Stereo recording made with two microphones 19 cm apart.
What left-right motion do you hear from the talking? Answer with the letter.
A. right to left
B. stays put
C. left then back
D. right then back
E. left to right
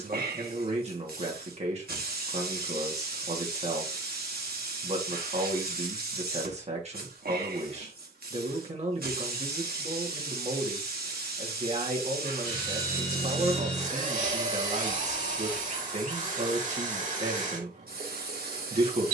B.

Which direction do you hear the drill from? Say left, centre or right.
right.